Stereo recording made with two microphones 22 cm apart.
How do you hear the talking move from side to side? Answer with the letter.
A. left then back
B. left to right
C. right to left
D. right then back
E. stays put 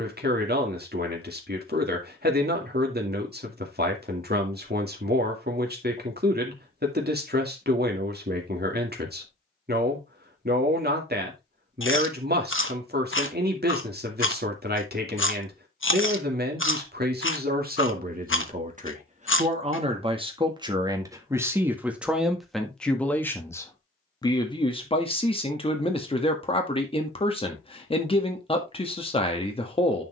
C.